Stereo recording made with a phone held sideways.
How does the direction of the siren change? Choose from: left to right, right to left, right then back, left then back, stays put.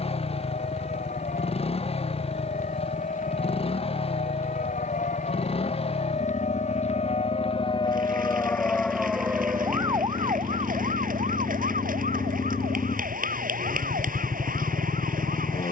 left to right.